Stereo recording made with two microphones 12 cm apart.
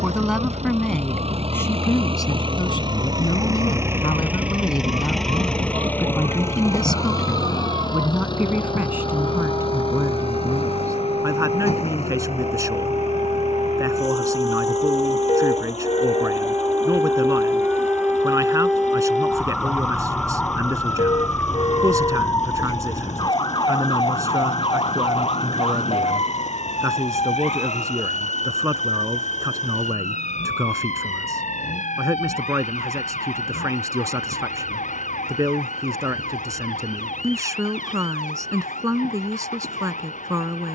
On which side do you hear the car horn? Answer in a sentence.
In this clip you hear the car horn on the left.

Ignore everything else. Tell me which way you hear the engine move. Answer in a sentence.
In this clip you hear the engine move from right to left.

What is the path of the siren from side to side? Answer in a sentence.
You can hear the siren go from the right side to the left.